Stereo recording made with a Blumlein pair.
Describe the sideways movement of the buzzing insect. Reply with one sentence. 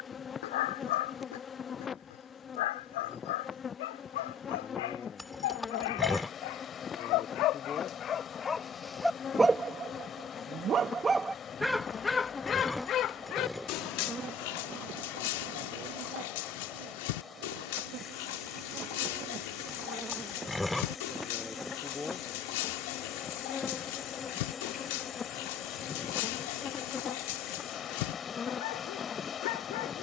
You can hear the buzzing insect go right and come back.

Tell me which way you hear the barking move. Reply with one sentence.
You can hear the barking move from left to right and back again.